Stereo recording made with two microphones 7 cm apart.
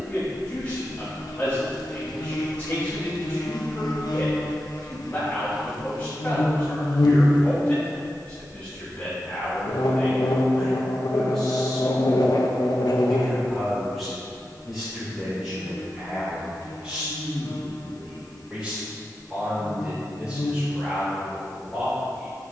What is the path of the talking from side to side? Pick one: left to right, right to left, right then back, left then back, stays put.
left to right.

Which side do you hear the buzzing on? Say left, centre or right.
left.